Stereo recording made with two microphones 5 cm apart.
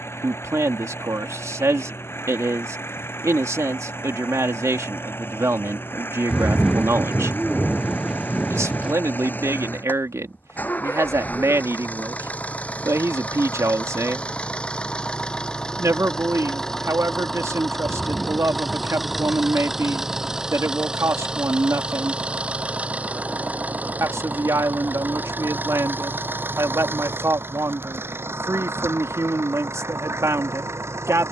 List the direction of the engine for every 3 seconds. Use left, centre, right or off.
left, left, left, left, left, centre, centre, right, right, right, right.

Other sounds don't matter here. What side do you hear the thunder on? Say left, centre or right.
centre.